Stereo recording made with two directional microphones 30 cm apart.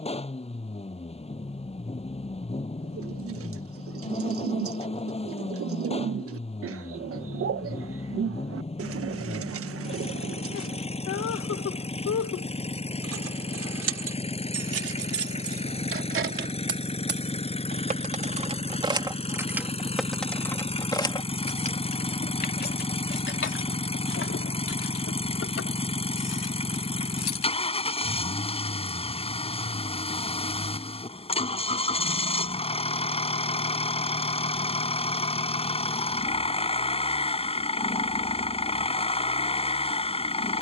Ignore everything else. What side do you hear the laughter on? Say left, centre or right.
left.